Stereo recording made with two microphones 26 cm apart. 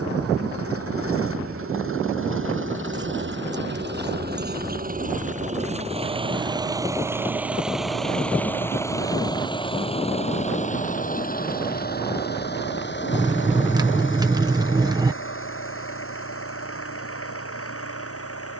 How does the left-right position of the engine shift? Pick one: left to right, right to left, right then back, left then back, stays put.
right to left.